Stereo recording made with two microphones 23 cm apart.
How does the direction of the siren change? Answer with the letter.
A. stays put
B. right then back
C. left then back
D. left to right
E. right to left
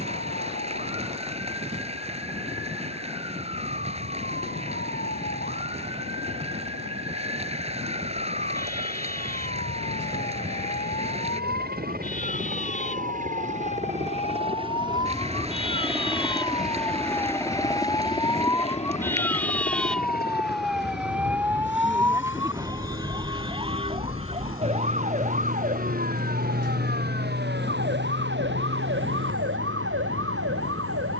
D.